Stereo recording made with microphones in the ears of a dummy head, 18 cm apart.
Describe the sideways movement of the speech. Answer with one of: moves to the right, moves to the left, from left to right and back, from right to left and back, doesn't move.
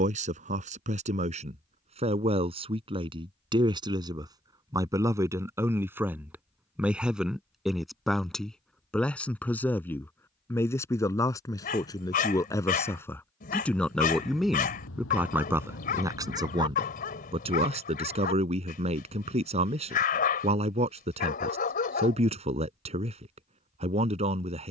from right to left and back.